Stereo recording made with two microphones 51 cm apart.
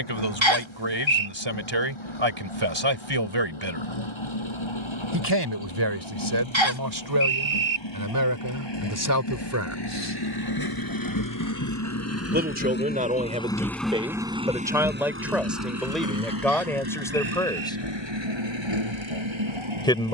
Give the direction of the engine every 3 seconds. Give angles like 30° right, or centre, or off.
70° left, 70° left, 60° left, 50° left, 10° left, 40° right, 60° right.